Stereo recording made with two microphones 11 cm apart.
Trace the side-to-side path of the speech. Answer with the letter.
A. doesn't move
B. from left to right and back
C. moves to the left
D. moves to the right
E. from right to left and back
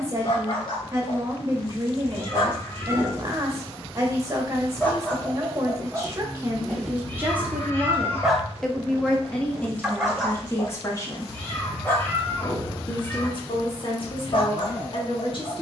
C.